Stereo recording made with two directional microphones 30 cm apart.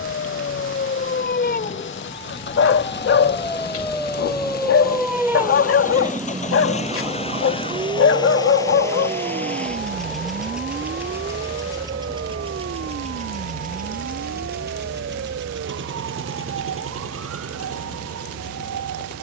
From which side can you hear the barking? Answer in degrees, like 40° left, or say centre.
50° left.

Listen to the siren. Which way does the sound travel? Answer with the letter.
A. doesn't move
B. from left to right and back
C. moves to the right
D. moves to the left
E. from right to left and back
C.